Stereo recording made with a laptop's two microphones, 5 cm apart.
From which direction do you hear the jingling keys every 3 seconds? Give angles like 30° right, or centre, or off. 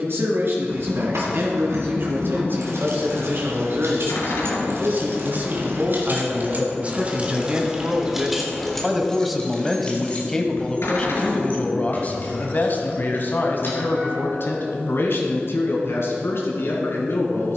80° right, 60° right, 20° right, 30° left, 50° left, off.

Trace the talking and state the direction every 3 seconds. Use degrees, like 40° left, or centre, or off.
60° right, 40° right, 20° right, 10° left, 50° left, 70° left.